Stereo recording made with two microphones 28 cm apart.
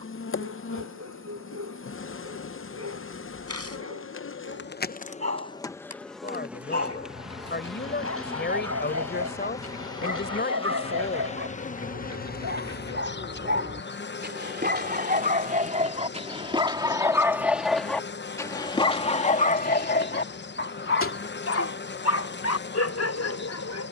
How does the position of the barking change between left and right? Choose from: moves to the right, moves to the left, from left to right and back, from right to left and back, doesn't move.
moves to the left.